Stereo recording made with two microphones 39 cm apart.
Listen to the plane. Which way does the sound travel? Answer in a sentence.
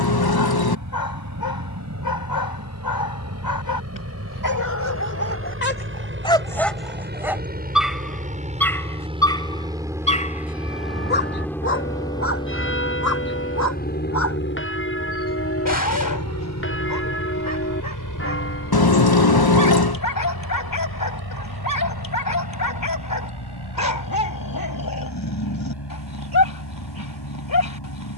You can hear the plane travel towards the left.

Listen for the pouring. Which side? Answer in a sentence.
You can hear the pouring on the left.